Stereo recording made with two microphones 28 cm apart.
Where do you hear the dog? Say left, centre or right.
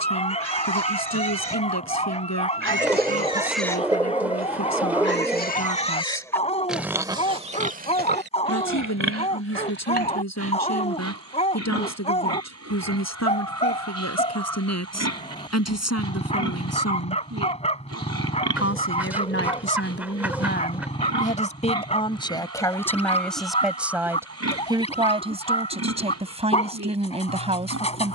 left.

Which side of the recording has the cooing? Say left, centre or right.
centre.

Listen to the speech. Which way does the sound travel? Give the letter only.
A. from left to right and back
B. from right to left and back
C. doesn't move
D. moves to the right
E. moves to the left
D.